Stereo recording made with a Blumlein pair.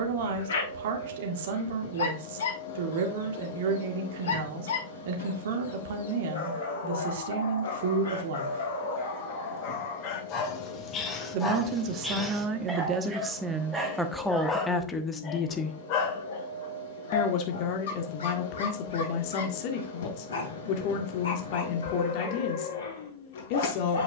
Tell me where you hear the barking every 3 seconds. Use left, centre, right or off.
left, left, left, left, centre, left, left, left.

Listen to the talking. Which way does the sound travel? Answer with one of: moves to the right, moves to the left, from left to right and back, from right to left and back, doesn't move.
moves to the left.